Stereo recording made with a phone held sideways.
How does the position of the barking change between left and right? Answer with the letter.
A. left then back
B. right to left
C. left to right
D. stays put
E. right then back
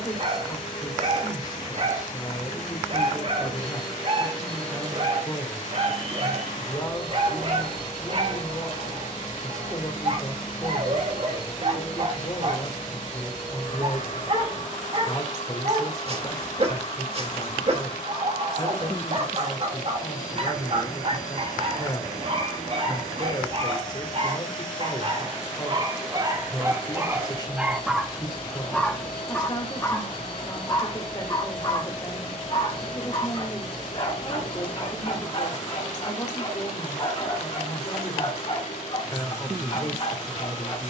B.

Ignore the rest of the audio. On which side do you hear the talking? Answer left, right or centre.
left.